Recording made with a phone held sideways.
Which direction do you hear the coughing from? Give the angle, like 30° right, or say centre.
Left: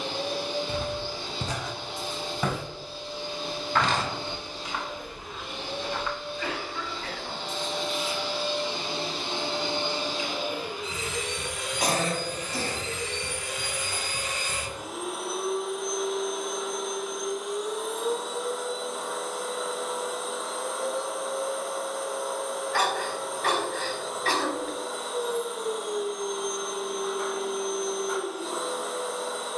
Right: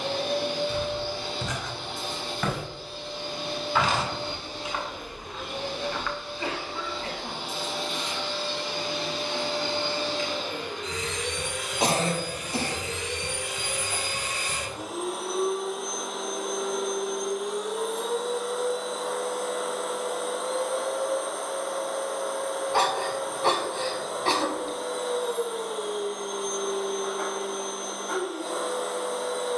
30° right.